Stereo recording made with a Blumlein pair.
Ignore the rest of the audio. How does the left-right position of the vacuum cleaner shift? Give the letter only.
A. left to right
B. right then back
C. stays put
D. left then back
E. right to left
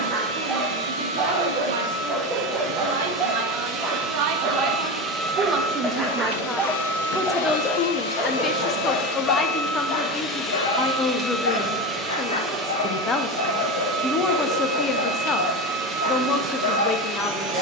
D.